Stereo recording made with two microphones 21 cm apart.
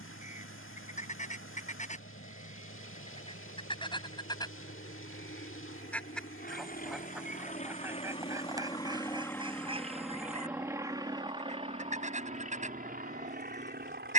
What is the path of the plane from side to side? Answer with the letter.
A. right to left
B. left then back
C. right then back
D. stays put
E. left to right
E.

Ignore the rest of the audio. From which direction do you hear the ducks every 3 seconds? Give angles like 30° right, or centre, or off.
40° left, 20° left, 10° right, 30° right, 30° right.